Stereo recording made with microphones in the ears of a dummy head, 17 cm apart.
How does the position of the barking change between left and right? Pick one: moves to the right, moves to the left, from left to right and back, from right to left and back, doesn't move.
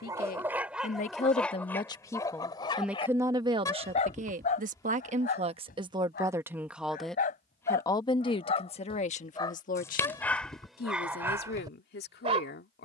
from right to left and back.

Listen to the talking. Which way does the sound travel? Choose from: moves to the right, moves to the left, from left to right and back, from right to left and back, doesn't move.
from left to right and back.